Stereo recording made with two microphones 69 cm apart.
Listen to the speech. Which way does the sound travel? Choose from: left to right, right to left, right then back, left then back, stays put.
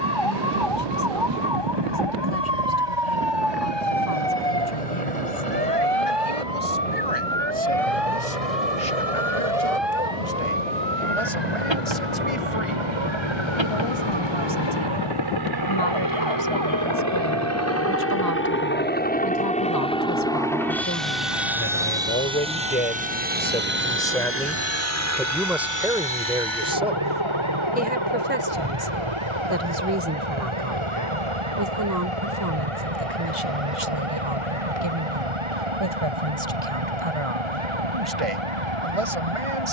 left to right.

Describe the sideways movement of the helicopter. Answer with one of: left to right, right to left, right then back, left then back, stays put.
left to right.